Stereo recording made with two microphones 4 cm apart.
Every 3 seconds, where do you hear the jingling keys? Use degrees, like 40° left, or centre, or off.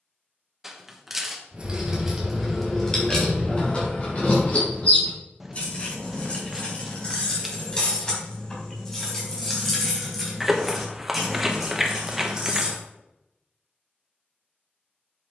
centre, 30° left, 20° left, centre, 10° right.